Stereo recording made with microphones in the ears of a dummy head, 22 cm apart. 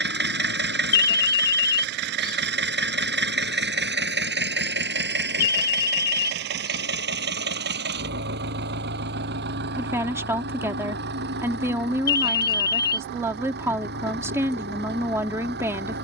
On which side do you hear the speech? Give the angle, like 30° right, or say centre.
10° right.